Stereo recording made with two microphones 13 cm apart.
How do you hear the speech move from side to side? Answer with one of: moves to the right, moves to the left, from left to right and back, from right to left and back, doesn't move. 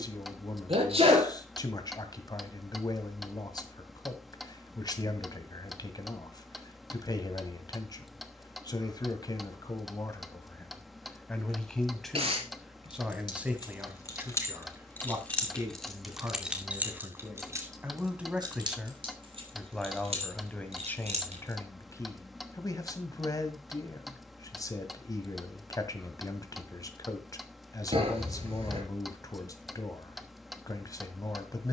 from left to right and back.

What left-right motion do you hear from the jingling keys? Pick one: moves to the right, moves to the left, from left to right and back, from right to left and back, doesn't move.
moves to the right.